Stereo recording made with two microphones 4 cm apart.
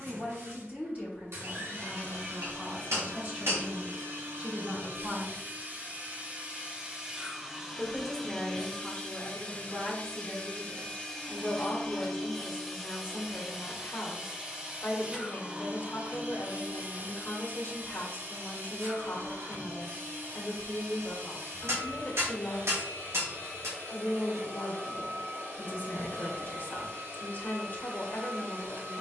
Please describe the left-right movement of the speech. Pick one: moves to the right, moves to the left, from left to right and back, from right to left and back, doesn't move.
moves to the left.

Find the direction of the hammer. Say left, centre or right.
right.